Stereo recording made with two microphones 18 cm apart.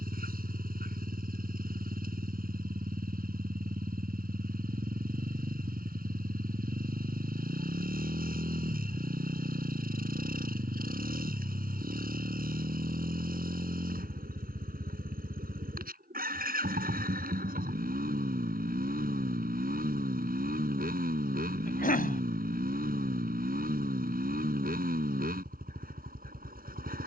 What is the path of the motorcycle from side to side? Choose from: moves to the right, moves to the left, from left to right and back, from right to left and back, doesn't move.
doesn't move.